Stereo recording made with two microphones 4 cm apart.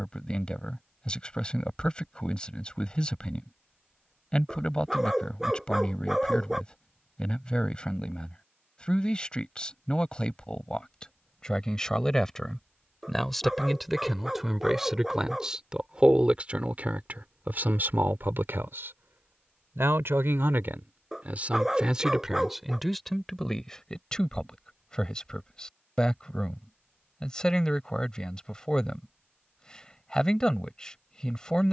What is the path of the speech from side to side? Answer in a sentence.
You can hear the speech go right and come back.